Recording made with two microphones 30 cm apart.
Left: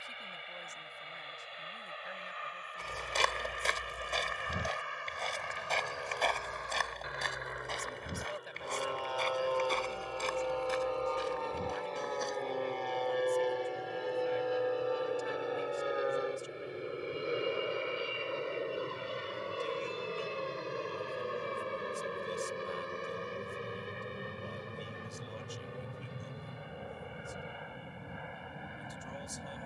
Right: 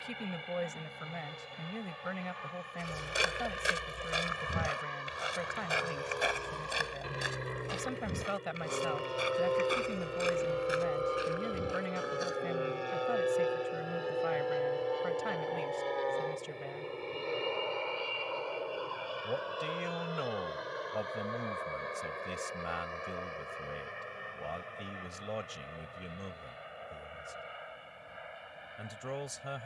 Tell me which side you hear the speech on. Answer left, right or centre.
right.